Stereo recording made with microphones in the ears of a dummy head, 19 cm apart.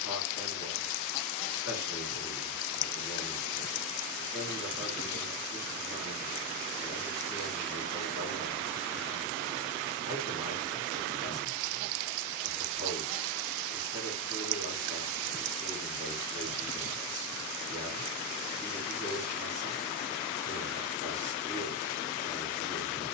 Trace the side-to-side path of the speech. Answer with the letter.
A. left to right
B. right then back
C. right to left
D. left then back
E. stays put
E.